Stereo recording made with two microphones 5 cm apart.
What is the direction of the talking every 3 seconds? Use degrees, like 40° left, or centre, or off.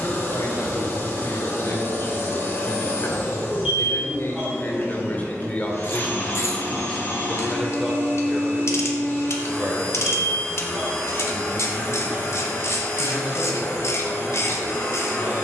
70° left, 40° left, centre, 30° right, 40° right.